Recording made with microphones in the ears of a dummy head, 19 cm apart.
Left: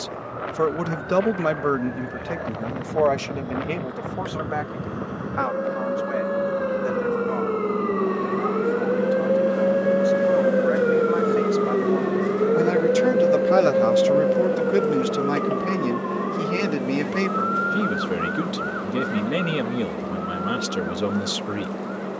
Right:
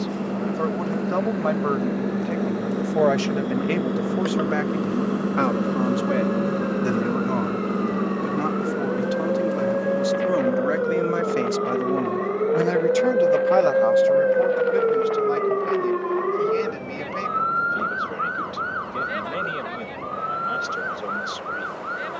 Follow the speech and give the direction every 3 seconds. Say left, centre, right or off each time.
left, right, right, right, left, left, left, left.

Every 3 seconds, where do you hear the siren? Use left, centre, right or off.
left, left, left, left, centre, right, right, right.